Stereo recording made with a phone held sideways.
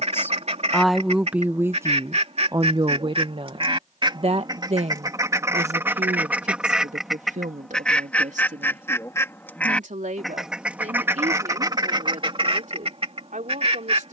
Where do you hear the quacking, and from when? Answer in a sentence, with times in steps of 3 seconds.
In this clip you hear the quacking on the right from 0 s, in the centre from 6 s and on the right from 12 s.